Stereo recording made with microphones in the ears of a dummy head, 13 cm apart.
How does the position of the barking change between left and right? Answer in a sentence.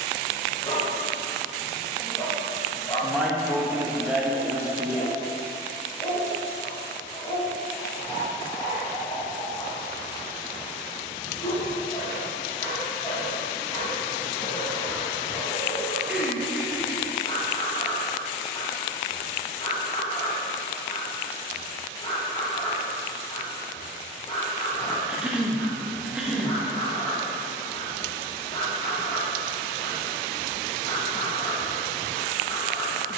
In this clip you hear the barking stay put.